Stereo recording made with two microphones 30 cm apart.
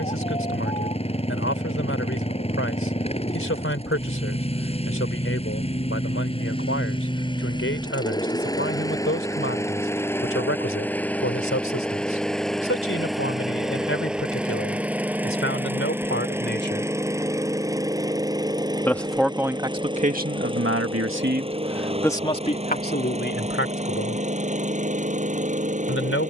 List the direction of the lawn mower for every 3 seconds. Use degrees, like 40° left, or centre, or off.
20° left, 20° left, 10° left, 10° left, centre, 10° right, 10° right, 20° right, 20° right.